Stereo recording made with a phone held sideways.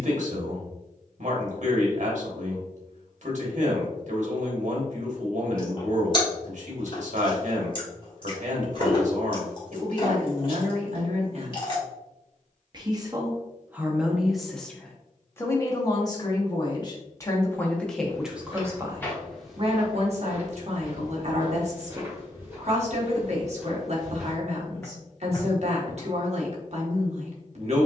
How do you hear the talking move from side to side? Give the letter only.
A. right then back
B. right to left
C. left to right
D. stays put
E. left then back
E.